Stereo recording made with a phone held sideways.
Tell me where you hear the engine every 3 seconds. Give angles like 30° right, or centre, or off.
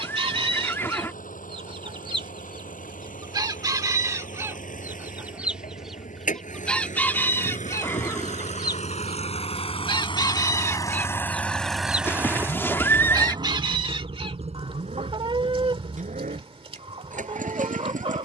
80° left, 70° left, 60° left, 30° left, 30° right, 60° right.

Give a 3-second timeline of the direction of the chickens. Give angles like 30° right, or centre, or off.
40° right, 20° right, 20° left, 20° left, 40° right, 40° right.